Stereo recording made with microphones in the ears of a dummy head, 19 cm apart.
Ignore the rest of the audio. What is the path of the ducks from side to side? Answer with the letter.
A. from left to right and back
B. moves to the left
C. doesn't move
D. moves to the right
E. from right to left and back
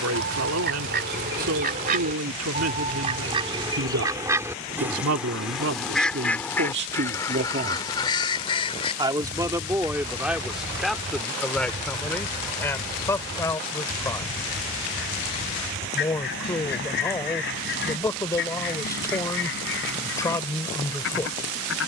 B.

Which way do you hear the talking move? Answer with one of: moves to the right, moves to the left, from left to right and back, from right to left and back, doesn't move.
moves to the left.